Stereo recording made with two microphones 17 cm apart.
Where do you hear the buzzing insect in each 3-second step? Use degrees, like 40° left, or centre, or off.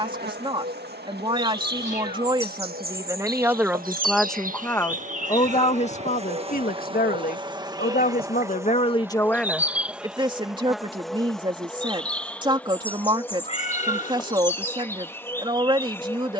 70° right, 50° right, 30° right, centre, 10° left, 10° left.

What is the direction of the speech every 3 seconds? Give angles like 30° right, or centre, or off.
30° right, 10° left, 60° left, 20° right, 30° right, 30° right.